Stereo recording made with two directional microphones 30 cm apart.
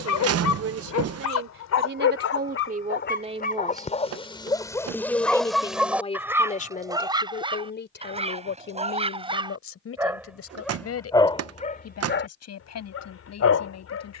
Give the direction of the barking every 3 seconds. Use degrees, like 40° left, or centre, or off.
60° left, 10° left, 20° right, centre, 50° left.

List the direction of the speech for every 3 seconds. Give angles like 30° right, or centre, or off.
40° right, centre, 30° left, 50° left, 60° left.